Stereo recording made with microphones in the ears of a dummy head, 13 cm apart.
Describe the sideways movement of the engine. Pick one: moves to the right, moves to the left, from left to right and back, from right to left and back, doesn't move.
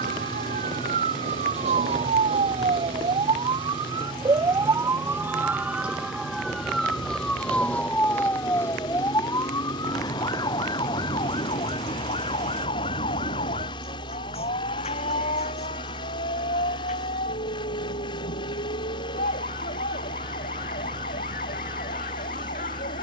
doesn't move.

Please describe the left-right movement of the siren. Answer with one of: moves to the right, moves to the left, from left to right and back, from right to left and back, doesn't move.
moves to the left.